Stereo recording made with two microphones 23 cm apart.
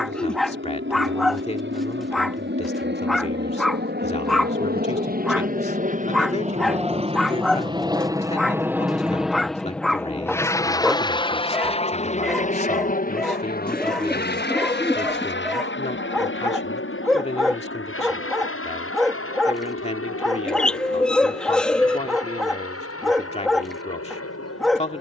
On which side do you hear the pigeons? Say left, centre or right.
centre.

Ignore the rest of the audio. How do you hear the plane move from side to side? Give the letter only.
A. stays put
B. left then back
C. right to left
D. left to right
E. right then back
C.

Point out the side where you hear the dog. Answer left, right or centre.
centre.